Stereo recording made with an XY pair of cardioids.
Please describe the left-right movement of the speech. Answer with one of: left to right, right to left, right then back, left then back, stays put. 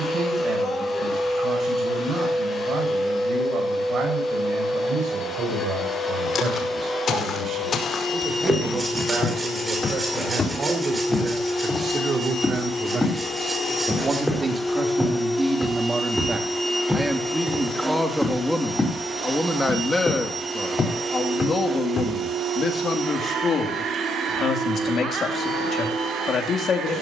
right to left.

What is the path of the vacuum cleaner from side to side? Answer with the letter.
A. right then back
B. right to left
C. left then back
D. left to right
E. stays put
D.